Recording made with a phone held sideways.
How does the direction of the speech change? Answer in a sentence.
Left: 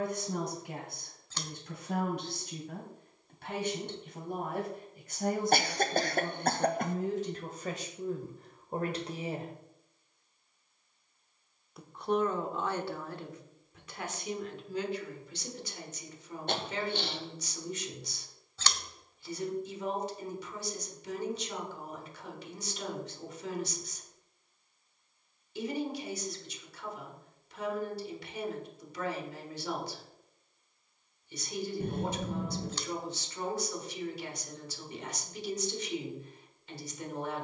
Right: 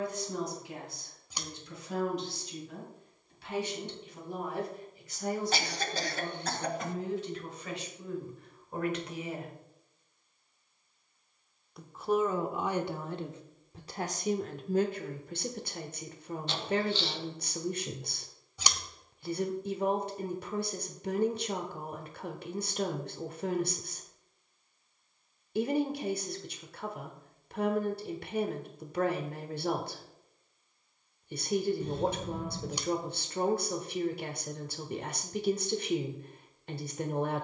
In this clip you hear the speech travel towards the right.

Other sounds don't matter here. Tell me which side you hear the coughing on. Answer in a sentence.
You can hear the coughing on the left.